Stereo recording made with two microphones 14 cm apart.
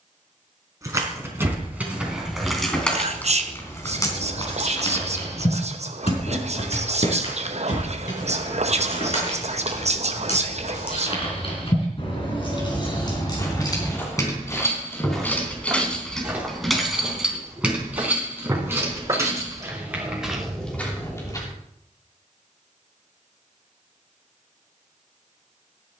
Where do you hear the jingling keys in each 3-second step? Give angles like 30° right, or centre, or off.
10° right, 30° left, 60° left, 50° left, 30° left, centre, 20° right, off, off.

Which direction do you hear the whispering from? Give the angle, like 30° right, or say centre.
50° right.